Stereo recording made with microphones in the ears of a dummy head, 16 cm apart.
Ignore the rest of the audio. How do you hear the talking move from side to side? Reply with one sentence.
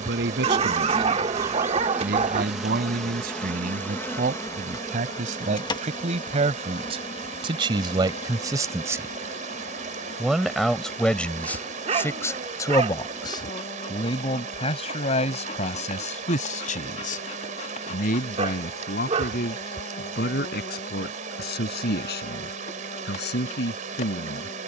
In this clip you hear the talking travel towards the left.